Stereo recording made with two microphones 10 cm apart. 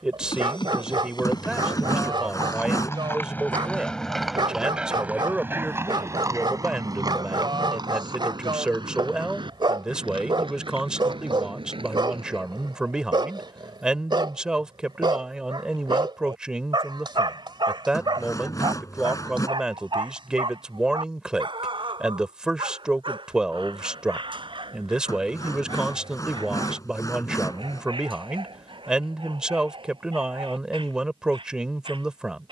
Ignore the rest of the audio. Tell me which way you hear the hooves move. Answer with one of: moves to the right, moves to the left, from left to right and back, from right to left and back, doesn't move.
moves to the right.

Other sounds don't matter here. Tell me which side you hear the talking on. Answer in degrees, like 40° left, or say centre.
10° right.